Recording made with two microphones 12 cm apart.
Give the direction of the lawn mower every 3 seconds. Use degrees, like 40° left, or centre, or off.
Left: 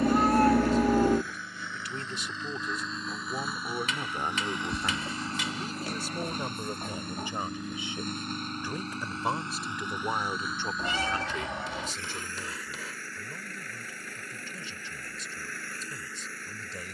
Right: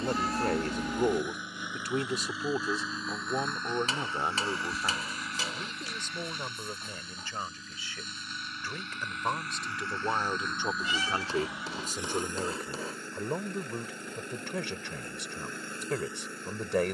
20° right, 20° left, 50° left, 10° left, 20° right, 20° right.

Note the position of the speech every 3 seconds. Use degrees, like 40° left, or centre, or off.
50° right, 10° right, 20° left, 10° right, 70° right, 80° right.